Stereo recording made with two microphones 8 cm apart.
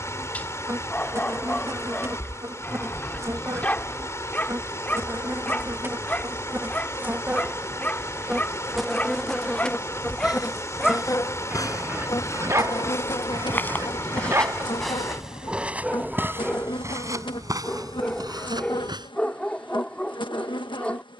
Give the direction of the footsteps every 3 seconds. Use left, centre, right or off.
off, off, off, left, left, right, right.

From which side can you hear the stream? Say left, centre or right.
left.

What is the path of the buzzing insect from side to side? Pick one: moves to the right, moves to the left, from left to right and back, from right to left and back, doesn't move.
moves to the left.